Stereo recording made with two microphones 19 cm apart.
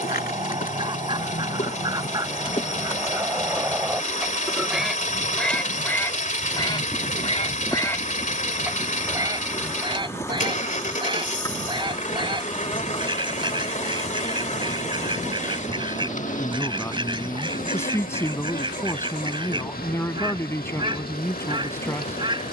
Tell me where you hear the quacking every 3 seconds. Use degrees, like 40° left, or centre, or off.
20° right, 10° right, 20° left, 20° right, 20° right, 20° right, 20° right, 20° right.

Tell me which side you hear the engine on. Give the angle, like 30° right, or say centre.
40° left.